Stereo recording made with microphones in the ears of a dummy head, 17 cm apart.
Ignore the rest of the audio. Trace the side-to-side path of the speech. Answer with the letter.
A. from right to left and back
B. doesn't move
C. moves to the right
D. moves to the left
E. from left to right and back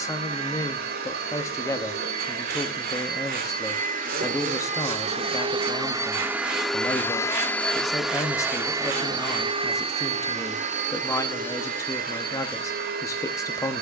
B.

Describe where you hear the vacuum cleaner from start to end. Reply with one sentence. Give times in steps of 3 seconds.
You can hear the vacuum cleaner on the right from 0 s, in the centre from 6 s and on the right from 9 s.